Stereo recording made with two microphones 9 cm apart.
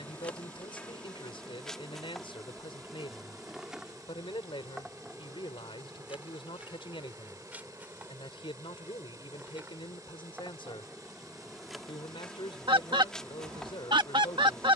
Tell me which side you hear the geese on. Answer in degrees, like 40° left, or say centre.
70° right.